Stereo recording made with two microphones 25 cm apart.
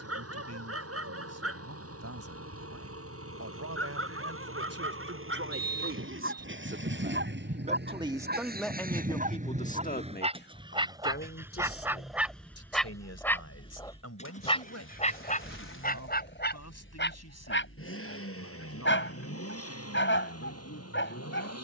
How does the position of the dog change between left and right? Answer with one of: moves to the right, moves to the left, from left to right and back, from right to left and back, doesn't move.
moves to the left.